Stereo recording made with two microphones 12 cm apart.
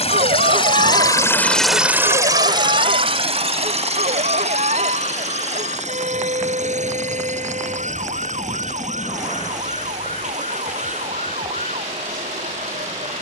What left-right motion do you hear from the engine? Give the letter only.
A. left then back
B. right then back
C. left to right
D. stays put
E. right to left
C.